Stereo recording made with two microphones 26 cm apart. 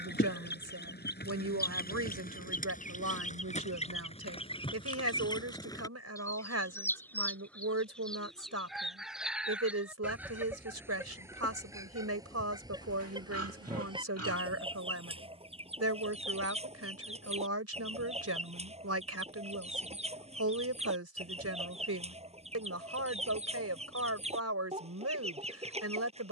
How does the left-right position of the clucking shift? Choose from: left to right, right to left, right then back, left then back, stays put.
left to right.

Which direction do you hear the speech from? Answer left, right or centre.
right.